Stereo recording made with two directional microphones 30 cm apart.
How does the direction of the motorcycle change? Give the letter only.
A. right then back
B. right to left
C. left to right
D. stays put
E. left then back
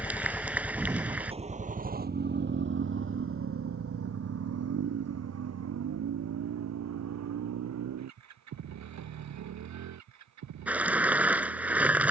C.